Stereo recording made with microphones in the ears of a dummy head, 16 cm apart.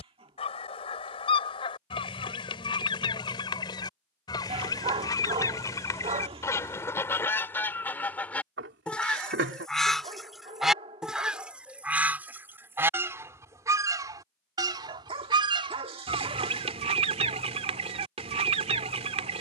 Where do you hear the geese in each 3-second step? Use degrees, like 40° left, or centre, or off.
30° left, 20° left, 10° left, centre, 20° right, 30° right, 30° right.